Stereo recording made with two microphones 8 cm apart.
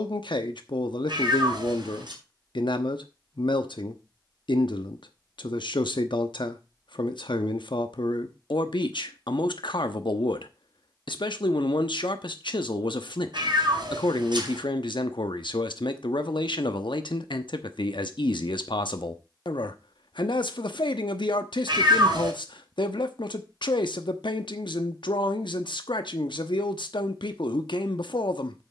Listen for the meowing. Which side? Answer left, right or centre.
right.